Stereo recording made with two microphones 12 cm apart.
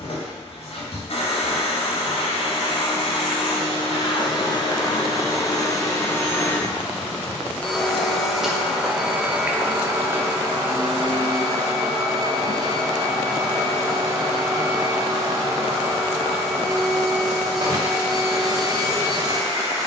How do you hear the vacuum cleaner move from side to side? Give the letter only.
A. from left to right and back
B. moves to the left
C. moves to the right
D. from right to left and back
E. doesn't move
C.